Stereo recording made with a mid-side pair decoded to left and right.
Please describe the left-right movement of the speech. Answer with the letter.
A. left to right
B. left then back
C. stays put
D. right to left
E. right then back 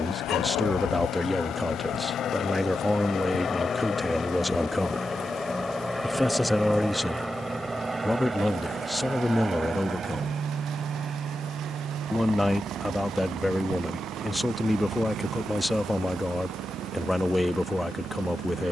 C.